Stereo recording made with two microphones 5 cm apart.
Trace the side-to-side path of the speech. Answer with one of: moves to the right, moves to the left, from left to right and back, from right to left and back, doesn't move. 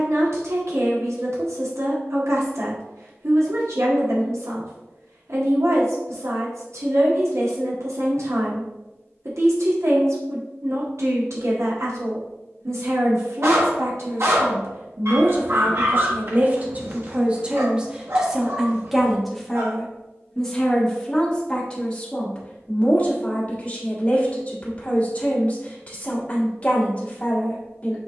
moves to the left.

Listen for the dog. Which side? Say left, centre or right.
right.